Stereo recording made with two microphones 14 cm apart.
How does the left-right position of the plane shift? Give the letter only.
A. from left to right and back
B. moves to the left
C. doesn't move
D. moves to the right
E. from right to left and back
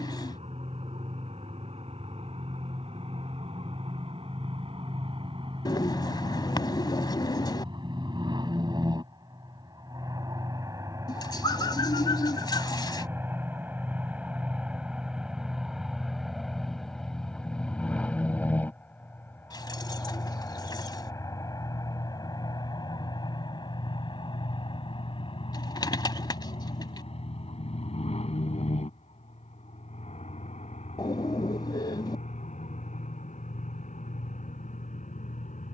B.